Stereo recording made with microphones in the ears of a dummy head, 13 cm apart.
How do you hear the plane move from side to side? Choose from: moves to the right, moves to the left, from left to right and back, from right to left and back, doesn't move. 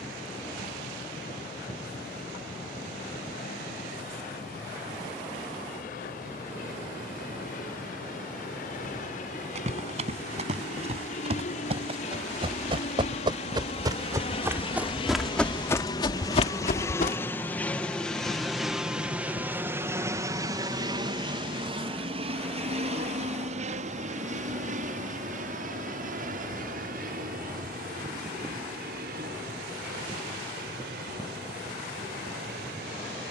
moves to the right.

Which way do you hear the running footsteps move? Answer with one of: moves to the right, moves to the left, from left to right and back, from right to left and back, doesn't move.
moves to the left.